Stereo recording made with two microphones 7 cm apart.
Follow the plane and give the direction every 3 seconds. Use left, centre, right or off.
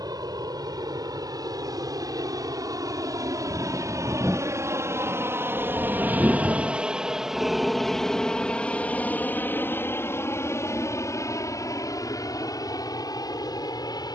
right, right, centre, left, left.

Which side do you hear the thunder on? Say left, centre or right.
centre.